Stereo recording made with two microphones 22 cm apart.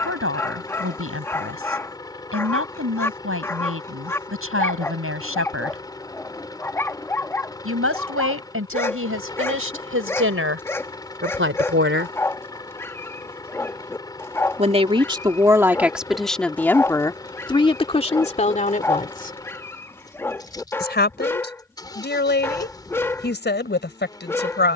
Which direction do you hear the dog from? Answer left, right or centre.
centre.